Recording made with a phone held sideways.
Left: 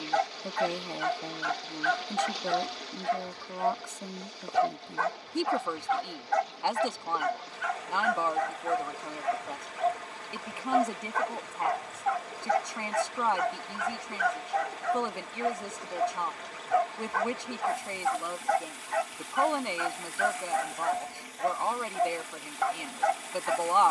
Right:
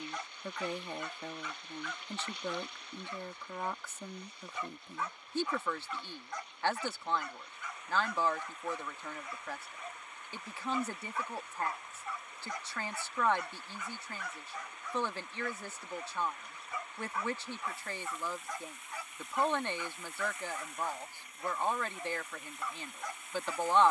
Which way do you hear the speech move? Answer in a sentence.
In this clip you hear the speech stay put.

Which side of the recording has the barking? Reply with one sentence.
In this clip you hear the barking on the left.